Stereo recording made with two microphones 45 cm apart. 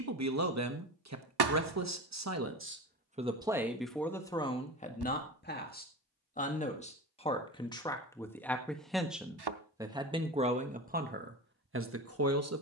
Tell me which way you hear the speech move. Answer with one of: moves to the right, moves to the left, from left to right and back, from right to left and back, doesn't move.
from right to left and back.